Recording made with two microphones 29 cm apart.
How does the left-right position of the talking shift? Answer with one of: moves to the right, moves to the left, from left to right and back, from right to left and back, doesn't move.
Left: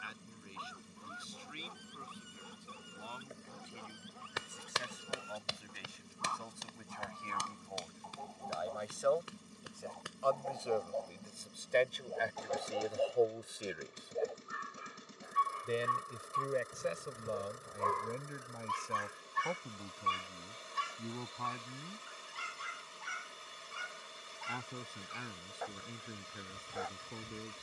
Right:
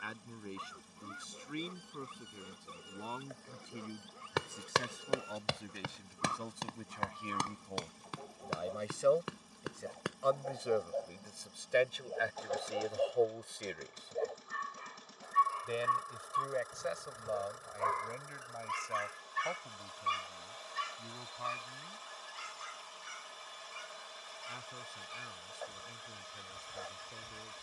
moves to the left.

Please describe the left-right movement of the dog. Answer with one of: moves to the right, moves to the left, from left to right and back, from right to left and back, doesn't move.
moves to the left.